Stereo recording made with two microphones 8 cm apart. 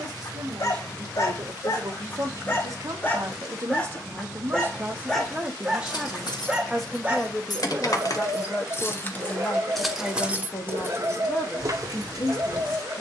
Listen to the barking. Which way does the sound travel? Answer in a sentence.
In this clip you hear the barking travel towards the right.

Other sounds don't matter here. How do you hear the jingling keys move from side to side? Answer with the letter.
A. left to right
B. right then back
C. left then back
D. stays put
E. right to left
A.